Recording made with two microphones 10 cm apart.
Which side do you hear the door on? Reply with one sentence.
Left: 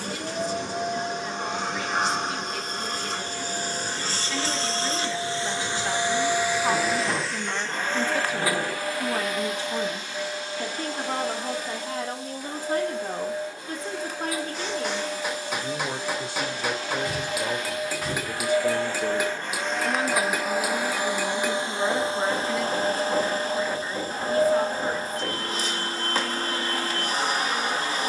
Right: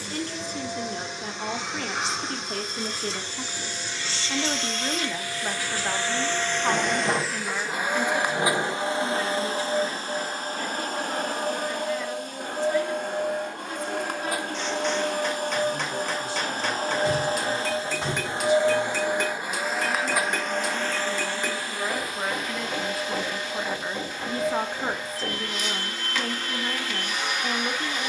In this clip you hear the door on the right.